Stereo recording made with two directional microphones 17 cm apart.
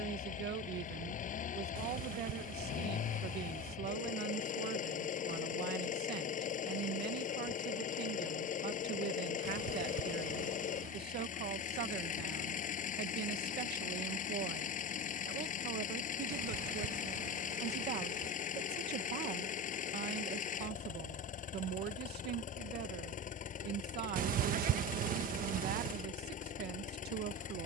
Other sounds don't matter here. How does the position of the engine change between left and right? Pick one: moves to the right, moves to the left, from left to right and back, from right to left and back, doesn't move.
doesn't move.